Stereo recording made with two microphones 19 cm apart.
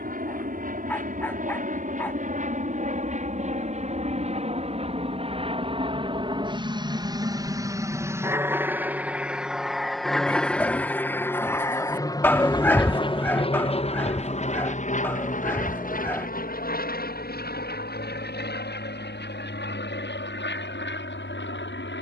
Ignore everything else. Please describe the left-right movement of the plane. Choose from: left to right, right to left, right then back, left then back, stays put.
right to left.